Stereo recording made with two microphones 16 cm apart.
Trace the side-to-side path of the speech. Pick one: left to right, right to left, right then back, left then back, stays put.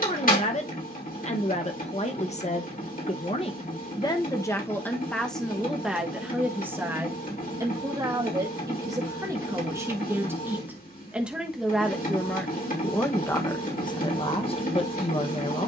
right then back.